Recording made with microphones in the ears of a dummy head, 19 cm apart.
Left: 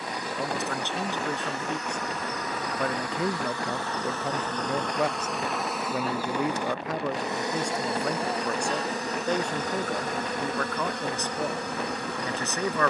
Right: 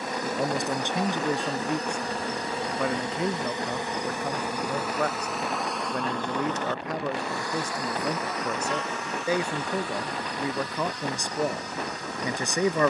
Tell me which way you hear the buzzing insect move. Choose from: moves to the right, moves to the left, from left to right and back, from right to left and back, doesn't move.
moves to the left.